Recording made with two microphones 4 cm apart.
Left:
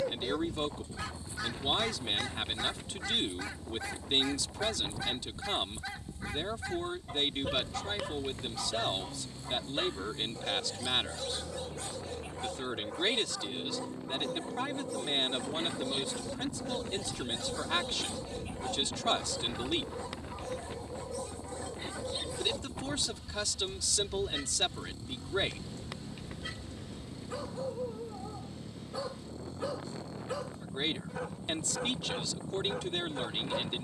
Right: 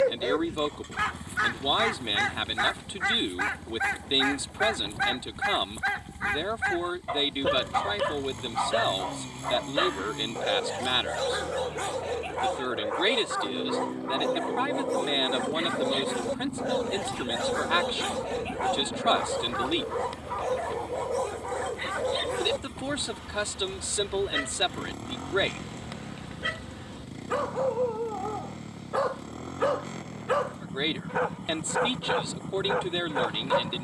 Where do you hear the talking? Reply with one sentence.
You can hear the talking on the right.